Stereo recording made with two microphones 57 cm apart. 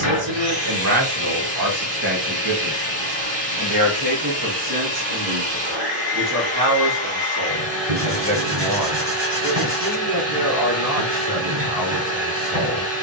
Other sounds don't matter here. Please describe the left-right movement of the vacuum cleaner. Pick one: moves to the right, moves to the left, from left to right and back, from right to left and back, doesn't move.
doesn't move.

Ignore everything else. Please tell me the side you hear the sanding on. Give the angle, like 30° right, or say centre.
20° right.